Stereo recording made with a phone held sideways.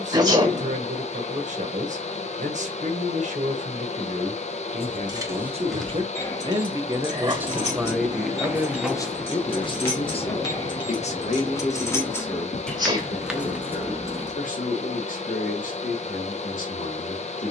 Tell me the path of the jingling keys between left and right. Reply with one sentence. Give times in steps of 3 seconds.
You can hear the jingling keys not at all from 0 s, in the centre from 3 s, on the left from 6 s, in the centre from 12 s and not at all from 15 s.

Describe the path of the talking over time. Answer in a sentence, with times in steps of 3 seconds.
You can hear the talking on the right from 0 s, in the centre from 6 s and on the left from 9 s.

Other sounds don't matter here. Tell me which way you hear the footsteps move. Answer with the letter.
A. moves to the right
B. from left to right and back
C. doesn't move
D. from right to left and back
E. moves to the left
E.